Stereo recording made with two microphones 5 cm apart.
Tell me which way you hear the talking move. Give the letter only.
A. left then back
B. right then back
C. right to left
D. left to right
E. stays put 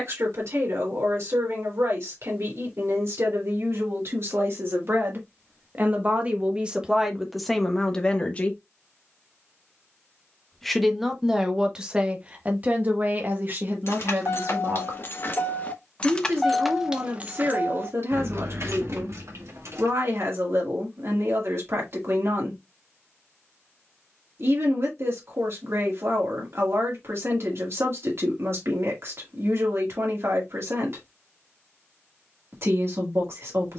A.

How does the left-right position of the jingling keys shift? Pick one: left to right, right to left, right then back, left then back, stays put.
left to right.